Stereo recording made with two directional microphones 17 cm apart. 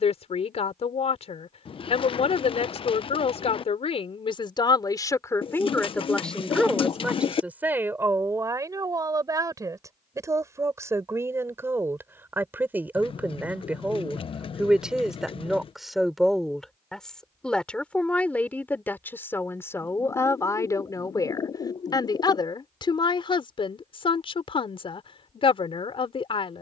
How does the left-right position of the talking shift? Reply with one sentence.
You can hear the talking move from left to right and back again.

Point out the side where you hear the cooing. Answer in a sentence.
You can hear the cooing on the left.